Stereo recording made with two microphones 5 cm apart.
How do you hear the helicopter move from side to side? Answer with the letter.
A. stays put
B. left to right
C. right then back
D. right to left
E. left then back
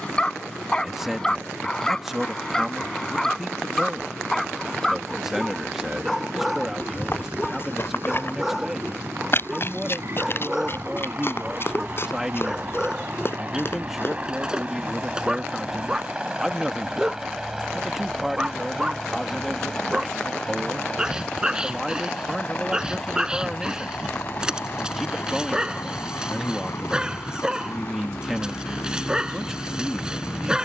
D.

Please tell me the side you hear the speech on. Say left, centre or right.
centre.